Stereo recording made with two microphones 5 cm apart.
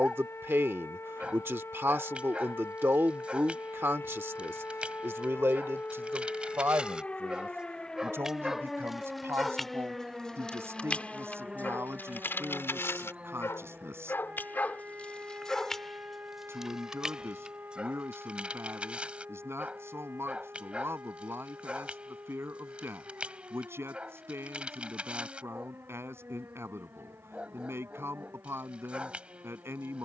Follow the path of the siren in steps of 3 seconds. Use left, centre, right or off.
left, left, left, centre, right, right, right, right, right, right.